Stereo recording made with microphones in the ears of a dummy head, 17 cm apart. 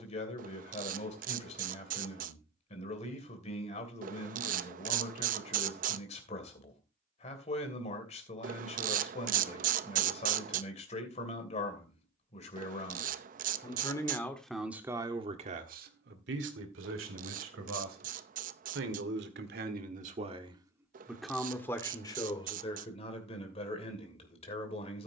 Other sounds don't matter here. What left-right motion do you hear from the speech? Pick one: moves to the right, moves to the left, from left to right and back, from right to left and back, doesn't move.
from left to right and back.